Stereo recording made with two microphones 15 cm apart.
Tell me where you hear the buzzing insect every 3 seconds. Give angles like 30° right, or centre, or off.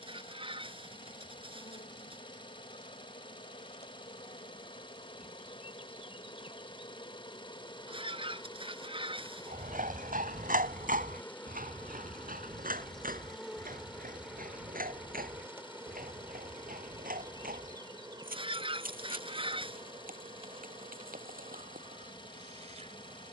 60° left, 50° left, 30° left, 20° left, centre, 20° right, 40° right, 50° right.